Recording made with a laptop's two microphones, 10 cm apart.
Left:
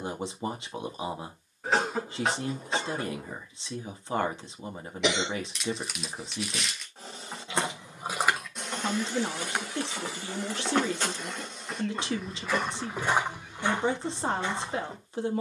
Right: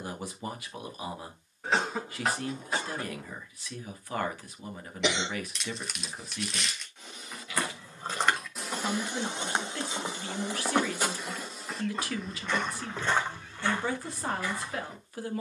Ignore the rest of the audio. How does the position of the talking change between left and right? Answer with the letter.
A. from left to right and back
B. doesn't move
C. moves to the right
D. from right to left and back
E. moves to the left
B.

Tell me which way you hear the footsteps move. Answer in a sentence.
You can hear the footsteps move from left to right and back again.